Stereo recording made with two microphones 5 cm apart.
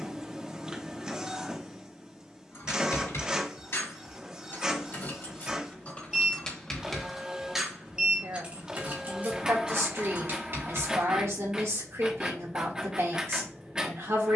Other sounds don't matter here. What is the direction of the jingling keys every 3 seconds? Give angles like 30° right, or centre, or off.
60° left, 50° left, 10° right, 50° right, off.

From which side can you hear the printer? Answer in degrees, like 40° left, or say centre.
20° right.